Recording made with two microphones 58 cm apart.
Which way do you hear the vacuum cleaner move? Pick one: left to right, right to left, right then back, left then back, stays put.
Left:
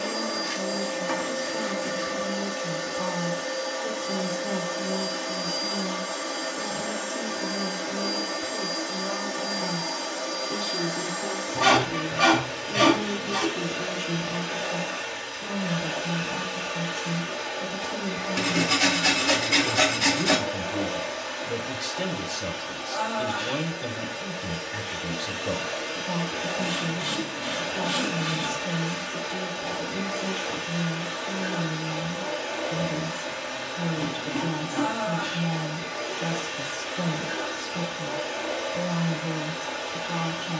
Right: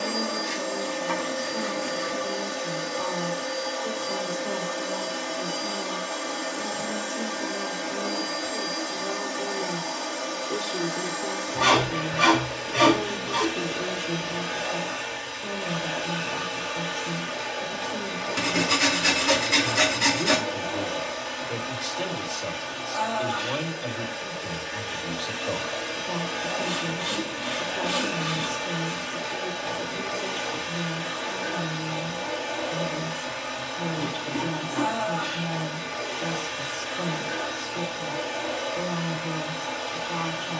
stays put.